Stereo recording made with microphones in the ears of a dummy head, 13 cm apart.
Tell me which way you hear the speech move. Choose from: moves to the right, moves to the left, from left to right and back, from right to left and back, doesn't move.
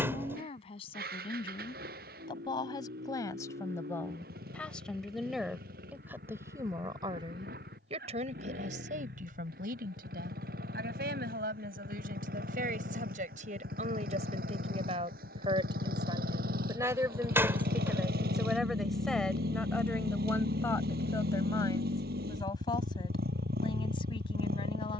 from left to right and back.